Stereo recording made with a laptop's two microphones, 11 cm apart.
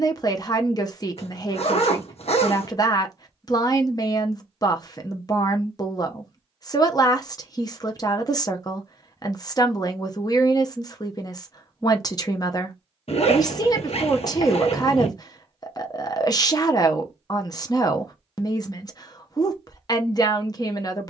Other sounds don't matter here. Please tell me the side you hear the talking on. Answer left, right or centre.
left.